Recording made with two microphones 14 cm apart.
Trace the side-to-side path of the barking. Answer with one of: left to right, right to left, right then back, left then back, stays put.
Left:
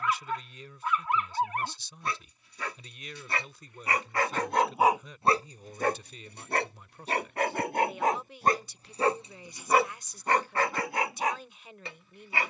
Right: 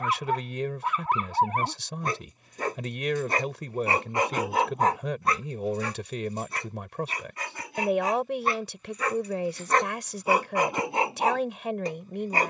left then back.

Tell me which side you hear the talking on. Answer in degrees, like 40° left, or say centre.
80° right.